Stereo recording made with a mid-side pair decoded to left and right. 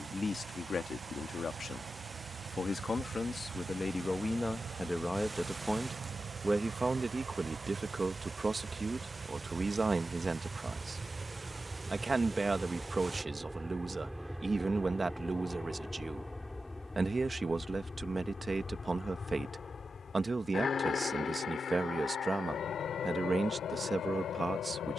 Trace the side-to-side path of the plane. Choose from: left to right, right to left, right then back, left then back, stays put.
right to left.